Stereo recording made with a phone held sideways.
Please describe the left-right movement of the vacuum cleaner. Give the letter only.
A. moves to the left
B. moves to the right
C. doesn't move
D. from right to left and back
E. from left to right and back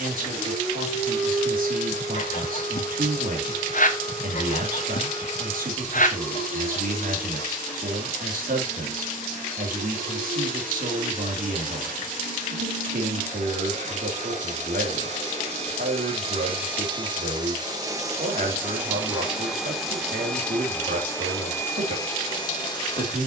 A.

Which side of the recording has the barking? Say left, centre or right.
left.